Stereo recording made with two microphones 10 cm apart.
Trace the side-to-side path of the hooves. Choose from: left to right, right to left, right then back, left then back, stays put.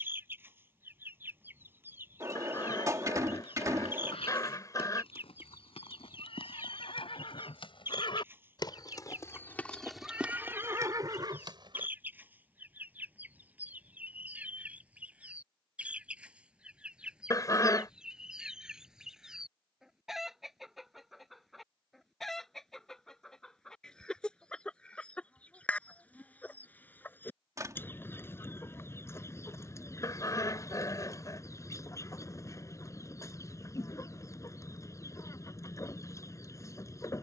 left to right.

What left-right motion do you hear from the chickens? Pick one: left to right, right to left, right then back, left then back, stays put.
right to left.